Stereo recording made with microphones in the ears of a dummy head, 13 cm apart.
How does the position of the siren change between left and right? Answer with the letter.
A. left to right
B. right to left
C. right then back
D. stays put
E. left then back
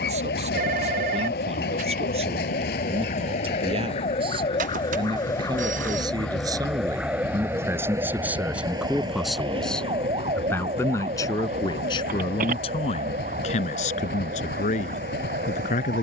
A.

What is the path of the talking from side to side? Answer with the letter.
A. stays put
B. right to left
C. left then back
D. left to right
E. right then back
B.